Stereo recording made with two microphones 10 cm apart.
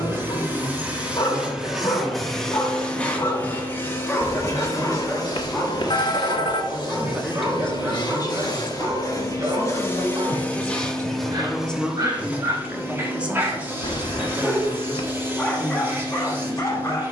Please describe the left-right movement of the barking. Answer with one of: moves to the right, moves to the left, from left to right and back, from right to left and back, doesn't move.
from left to right and back.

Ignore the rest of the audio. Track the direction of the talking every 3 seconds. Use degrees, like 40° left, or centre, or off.
30° right, 30° right, 10° left, 30° left, 10° right, 30° right.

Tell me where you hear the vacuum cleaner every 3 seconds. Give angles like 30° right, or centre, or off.
10° right, 30° left, 50° left, 10° left, 20° right, 20° right.